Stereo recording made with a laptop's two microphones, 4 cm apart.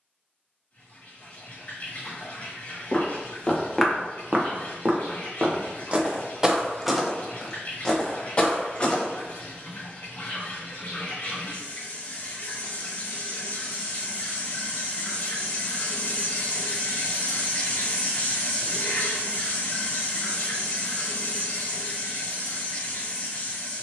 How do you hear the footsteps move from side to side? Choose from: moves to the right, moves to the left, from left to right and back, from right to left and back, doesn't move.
from left to right and back.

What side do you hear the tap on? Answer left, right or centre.
left.